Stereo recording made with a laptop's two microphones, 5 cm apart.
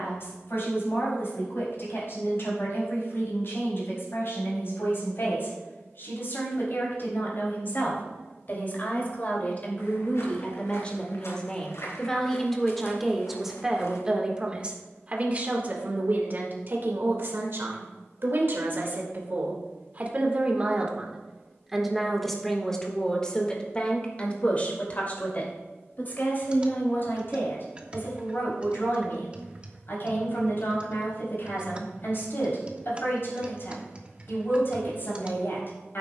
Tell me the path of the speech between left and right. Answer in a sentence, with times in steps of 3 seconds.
In this clip you hear the speech on the left from 0 s, in the centre from 12 s, on the right from 15 s, in the centre from 21 s and on the left from 24 s.